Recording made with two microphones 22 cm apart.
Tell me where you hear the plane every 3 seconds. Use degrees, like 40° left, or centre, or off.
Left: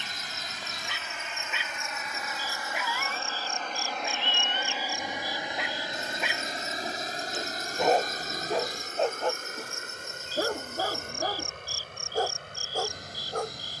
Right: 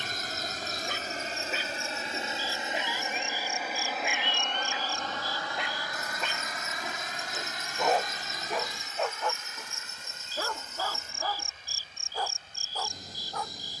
40° right, centre, 40° left, 50° left, 60° left.